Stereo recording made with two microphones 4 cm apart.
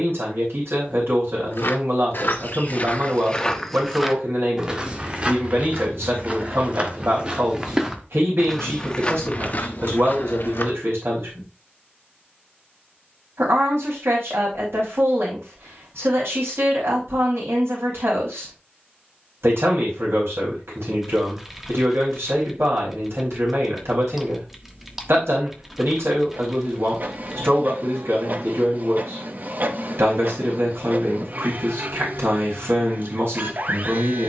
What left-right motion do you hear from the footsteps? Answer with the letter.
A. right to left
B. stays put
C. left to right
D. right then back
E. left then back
D.